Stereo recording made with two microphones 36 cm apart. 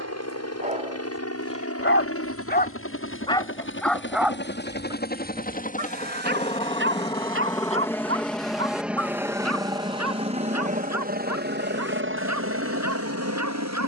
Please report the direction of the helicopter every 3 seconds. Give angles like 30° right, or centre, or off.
40° left, 30° left, 10° left, 20° right, 40° right.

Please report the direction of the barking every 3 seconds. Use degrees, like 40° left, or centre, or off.
centre, 10° right, 40° right, 50° right, 50° right.